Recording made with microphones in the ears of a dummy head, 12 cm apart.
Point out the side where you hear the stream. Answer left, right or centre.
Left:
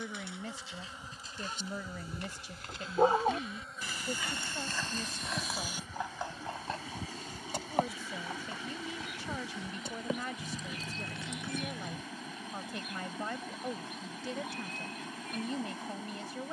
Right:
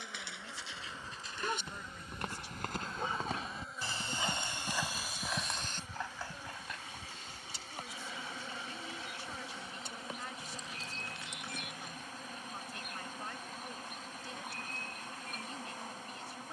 left.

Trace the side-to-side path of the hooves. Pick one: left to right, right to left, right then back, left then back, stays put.
right to left.